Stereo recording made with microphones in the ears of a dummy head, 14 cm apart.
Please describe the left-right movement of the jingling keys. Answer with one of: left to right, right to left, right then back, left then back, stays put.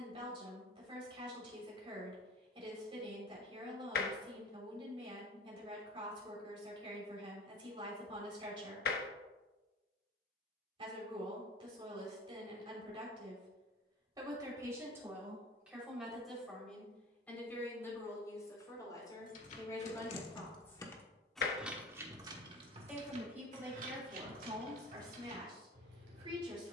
left to right.